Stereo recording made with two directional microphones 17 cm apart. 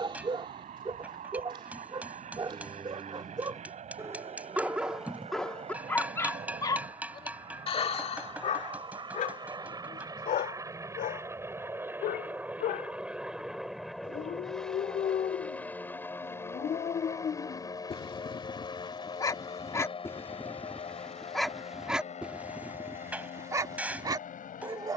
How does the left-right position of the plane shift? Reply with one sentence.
You can hear the plane travel towards the left.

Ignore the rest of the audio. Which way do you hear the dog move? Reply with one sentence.
You can hear the dog go left and come back.